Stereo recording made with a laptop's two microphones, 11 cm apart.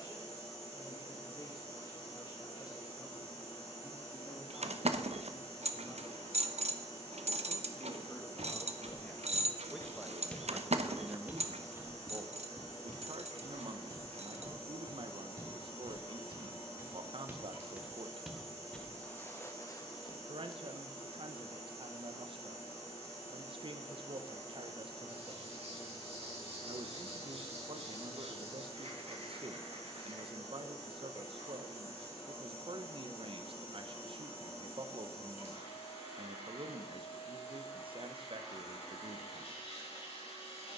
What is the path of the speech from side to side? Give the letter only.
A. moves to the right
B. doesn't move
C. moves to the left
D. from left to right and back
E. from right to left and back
A.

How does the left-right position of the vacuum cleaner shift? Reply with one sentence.
In this clip you hear the vacuum cleaner stay put.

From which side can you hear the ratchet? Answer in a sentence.
You can hear the ratchet on the right.